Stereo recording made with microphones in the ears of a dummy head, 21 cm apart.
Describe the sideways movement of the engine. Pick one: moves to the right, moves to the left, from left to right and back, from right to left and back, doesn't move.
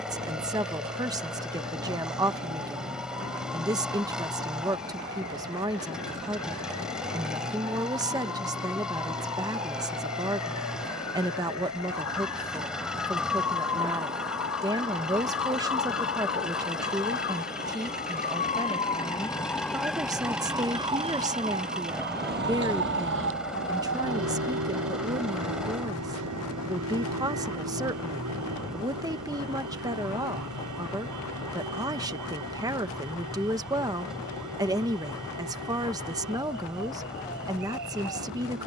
doesn't move.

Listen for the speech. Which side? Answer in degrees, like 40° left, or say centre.
20° right.